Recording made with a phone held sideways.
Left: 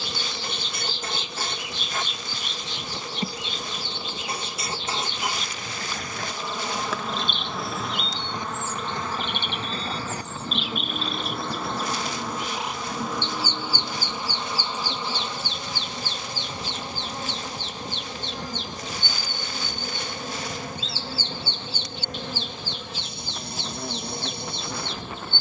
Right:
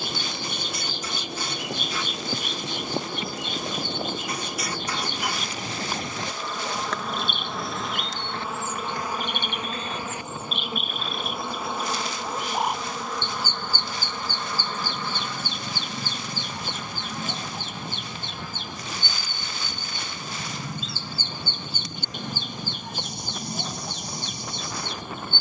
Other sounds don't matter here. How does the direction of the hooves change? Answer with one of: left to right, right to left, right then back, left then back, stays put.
right to left.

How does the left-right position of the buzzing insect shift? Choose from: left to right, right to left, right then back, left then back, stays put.
right then back.